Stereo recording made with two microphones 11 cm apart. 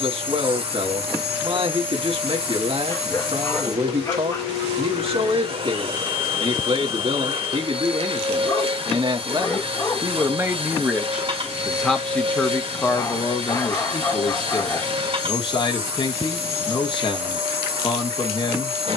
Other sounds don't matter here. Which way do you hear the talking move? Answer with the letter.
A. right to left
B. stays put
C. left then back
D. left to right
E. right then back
A.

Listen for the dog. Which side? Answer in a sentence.
In this clip you hear the dog on the left.